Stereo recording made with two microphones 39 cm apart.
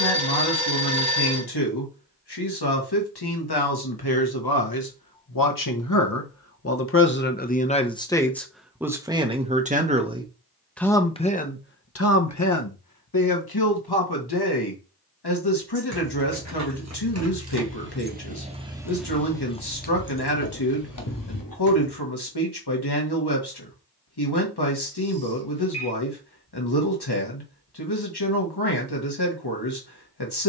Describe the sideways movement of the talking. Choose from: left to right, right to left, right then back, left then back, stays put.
right then back.